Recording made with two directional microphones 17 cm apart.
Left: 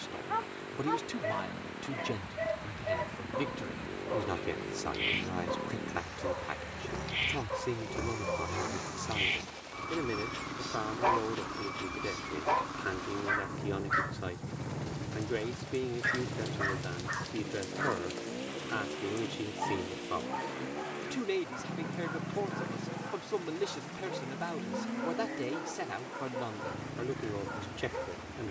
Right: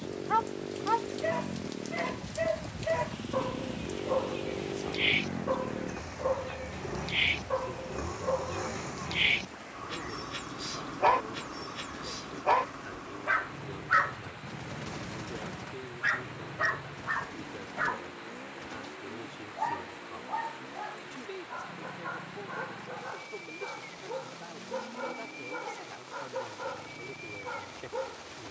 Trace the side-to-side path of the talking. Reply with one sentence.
In this clip you hear the talking stay put.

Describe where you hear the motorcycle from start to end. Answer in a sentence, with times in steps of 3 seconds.
You can hear the motorcycle on the right from 0 s, in the centre from 6 s and on the left from 12 s.